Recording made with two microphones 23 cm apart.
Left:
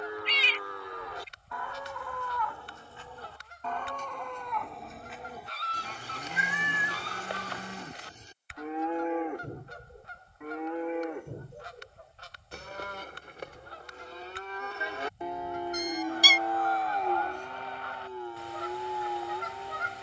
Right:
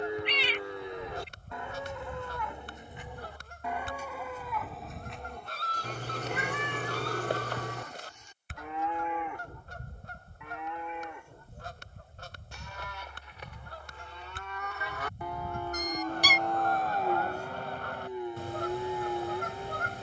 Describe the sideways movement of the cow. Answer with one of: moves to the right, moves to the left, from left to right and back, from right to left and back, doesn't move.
from right to left and back.